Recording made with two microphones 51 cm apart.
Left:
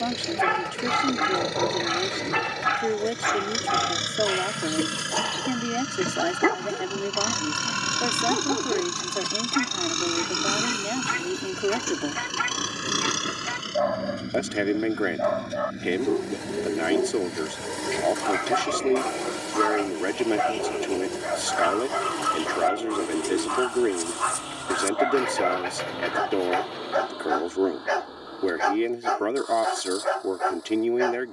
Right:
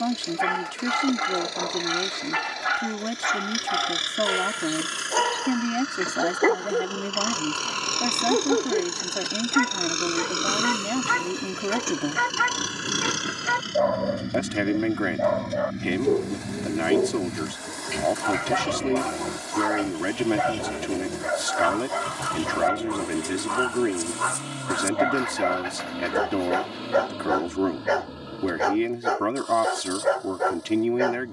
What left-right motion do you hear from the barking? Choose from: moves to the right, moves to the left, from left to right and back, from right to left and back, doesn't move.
doesn't move.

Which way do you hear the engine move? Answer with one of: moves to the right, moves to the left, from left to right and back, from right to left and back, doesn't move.
moves to the right.